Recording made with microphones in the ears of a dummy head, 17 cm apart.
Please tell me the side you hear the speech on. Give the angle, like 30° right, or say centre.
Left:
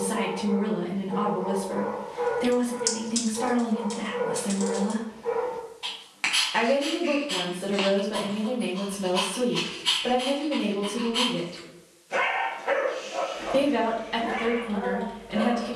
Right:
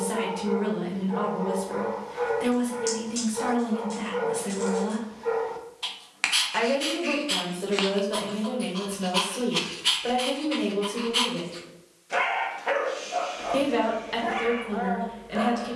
30° right.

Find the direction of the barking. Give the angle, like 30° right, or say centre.
40° right.